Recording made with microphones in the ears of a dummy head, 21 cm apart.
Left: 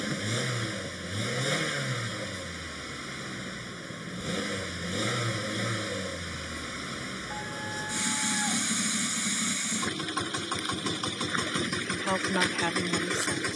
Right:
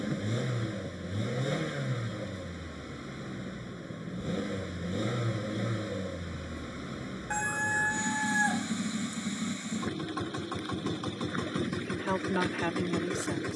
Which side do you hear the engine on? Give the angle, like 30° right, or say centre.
60° left.